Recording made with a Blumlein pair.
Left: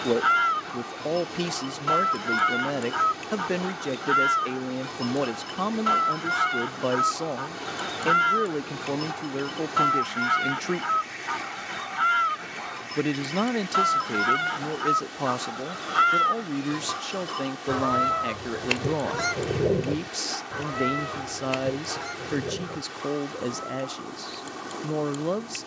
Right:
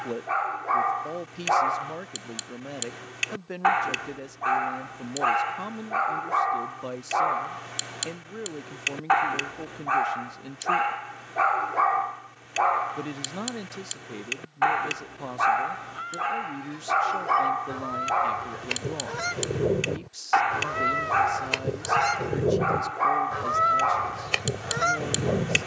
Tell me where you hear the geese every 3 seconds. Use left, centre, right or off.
left, left, left, left, left, left, centre, right, right.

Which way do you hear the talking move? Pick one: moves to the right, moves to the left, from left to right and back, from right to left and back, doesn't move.
doesn't move.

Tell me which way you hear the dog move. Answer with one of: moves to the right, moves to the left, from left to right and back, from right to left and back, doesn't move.
doesn't move.